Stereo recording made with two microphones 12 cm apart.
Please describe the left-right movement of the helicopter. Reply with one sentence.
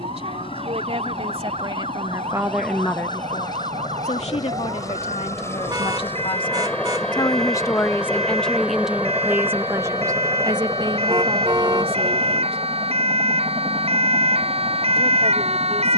In this clip you hear the helicopter travel towards the right.